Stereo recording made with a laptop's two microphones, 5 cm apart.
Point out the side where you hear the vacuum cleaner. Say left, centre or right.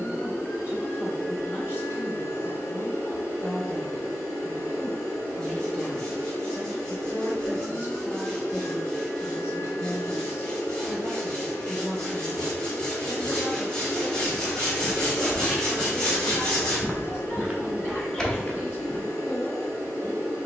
left.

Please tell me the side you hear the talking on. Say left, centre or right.
left.